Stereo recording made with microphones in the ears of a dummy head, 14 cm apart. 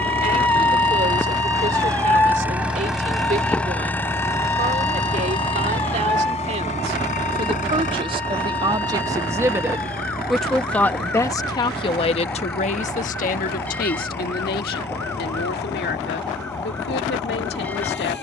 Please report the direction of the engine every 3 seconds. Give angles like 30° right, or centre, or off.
20° right, 20° left, 50° left, 70° left, 70° left, 80° left.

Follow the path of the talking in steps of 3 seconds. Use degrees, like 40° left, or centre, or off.
50° right, 50° right, 40° right, 10° left, 60° left, 80° left.